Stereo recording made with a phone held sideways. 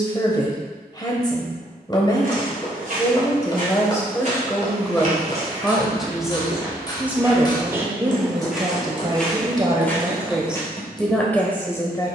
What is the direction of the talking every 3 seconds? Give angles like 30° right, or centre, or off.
30° left, 10° left, 10° right, 10° right.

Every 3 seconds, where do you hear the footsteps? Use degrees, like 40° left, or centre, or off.
60° right, 50° right, 10° right, 10° left.